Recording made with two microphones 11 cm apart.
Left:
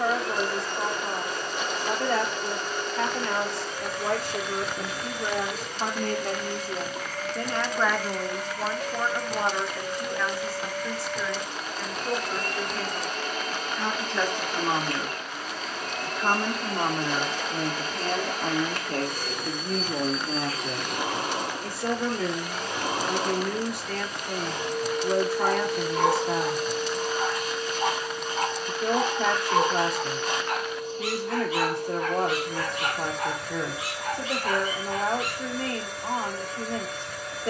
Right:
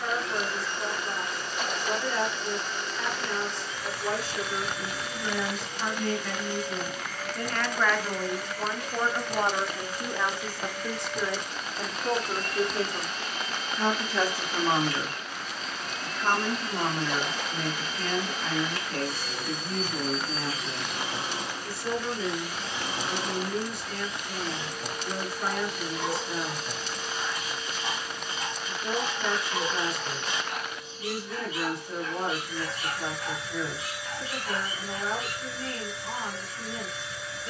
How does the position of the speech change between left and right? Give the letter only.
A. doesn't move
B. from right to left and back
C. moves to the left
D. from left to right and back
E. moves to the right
D.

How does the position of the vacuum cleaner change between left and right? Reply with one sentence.
You can hear the vacuum cleaner stay put.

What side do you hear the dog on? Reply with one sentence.
In this clip you hear the dog on the left.